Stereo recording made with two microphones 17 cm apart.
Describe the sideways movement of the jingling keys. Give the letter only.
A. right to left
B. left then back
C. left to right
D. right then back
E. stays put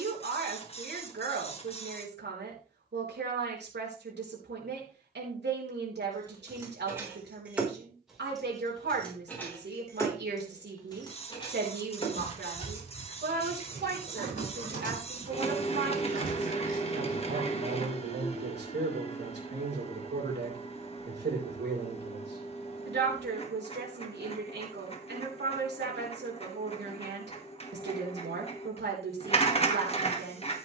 A.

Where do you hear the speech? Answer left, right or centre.
right.